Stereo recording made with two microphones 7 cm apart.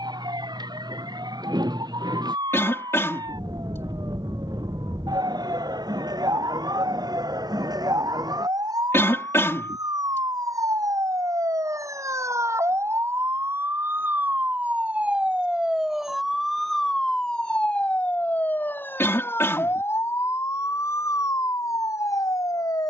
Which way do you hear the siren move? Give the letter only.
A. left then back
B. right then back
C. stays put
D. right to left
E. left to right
D.